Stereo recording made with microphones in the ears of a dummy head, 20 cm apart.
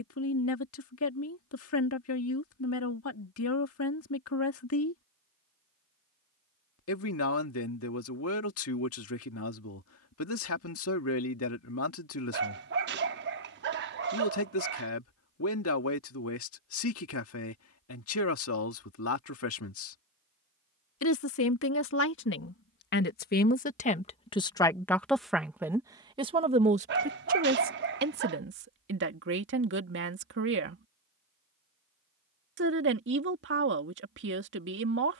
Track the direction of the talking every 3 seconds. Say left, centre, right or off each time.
left, left, left, left, left, left, left, left, centre, right, right, right.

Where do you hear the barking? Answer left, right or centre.
right.